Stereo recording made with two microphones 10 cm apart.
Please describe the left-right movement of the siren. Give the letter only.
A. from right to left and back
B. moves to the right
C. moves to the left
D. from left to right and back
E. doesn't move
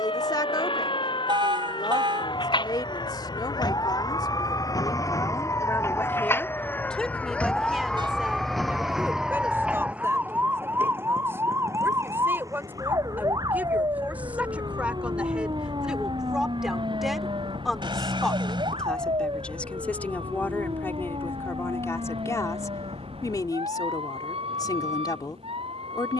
B.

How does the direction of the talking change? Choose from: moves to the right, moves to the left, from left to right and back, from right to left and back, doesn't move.
from left to right and back.